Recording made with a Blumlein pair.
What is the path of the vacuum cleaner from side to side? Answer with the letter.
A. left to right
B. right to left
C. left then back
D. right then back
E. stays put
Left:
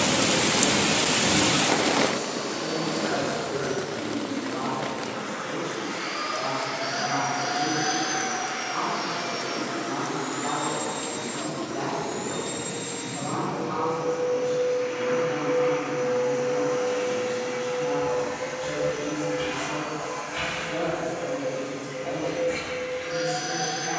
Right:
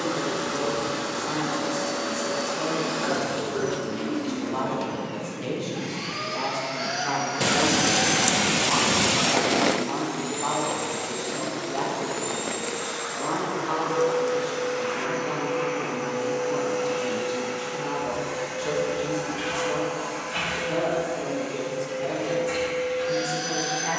E.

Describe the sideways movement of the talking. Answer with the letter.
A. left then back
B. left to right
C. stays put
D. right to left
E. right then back
C.